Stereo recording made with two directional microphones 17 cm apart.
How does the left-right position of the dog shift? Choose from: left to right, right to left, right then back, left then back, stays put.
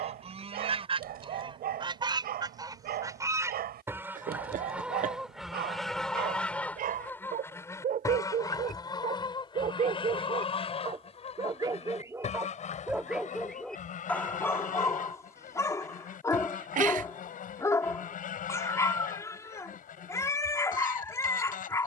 right to left.